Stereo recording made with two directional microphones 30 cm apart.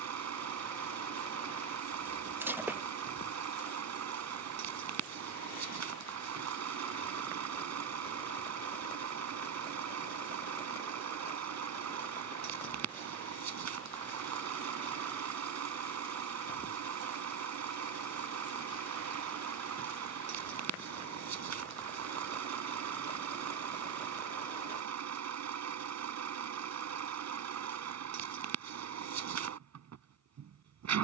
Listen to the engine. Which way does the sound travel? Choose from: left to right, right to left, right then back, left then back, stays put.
stays put.